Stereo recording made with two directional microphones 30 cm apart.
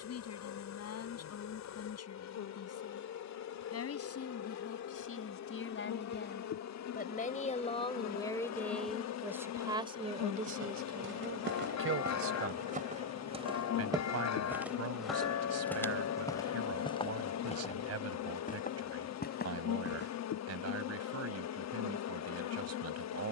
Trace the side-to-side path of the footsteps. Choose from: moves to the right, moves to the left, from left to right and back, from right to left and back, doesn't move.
moves to the left.